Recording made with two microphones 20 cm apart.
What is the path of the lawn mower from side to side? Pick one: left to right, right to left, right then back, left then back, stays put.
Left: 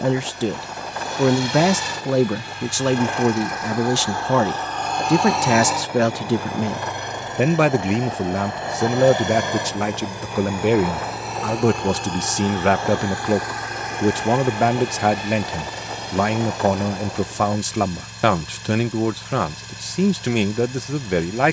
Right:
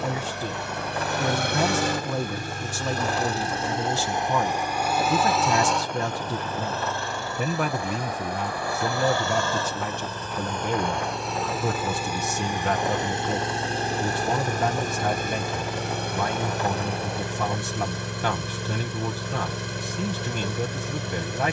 left then back.